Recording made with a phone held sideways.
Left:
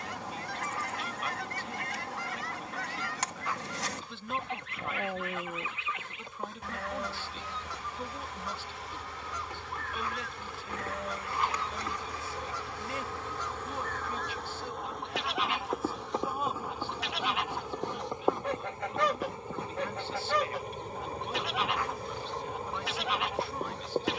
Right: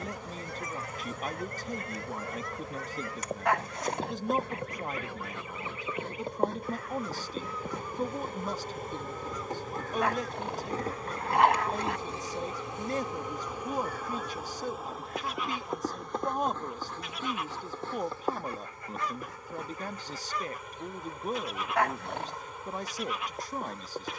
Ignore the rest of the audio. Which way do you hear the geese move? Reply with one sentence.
You can hear the geese stay in one place.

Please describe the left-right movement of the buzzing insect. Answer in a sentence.
In this clip you hear the buzzing insect go from the right side to the left.